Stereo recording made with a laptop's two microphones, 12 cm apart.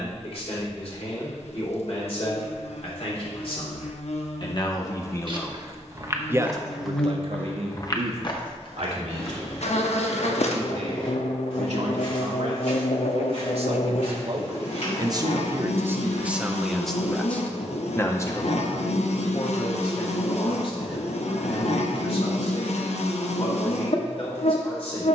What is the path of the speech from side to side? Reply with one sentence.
You can hear the speech move from left to right and back again.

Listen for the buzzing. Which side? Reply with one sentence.
You can hear the buzzing on the left.